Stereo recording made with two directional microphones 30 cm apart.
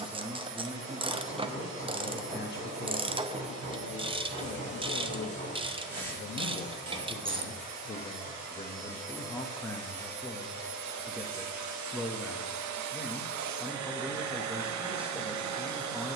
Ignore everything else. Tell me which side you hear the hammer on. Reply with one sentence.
You can hear the hammer on the right.